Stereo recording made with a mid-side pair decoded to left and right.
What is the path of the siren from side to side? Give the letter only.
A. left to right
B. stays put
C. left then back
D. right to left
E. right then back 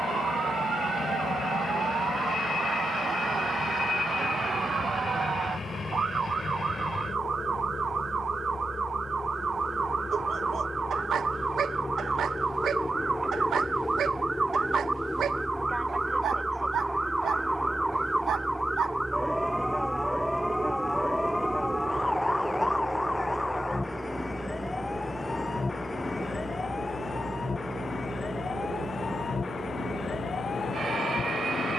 D.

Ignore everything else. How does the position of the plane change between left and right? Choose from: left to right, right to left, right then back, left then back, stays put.
left to right.